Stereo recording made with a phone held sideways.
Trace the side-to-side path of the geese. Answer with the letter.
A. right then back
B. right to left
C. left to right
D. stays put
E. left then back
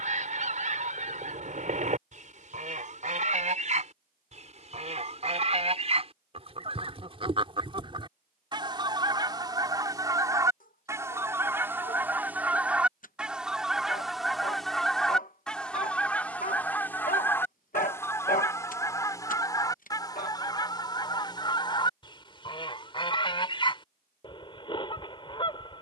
B.